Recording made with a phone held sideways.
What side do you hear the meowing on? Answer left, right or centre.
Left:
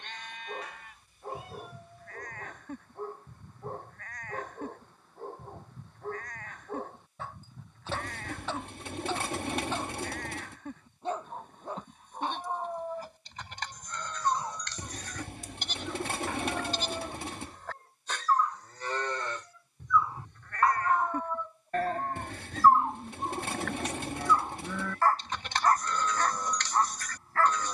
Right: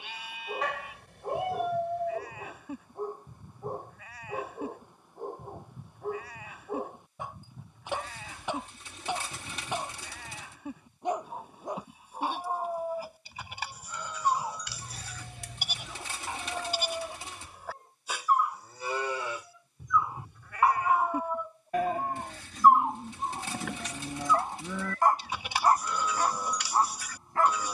right.